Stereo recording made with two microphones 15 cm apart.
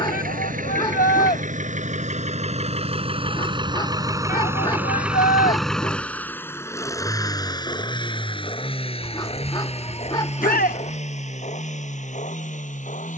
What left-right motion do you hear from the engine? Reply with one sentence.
In this clip you hear the engine travel towards the left.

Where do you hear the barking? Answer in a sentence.
In this clip you hear the barking on the left.